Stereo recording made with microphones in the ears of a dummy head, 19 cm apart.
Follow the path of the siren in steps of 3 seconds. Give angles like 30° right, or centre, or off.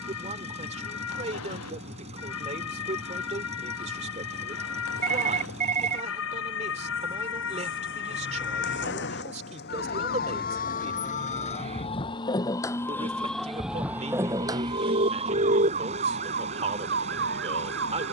70° left, 70° left, 60° left, 40° left, centre, 40° right.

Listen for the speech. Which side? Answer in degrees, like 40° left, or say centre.
30° right.